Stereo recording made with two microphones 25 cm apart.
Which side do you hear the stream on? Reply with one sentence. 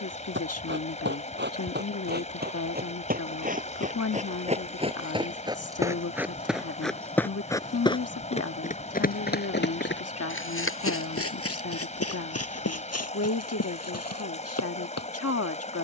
You can hear the stream on the left.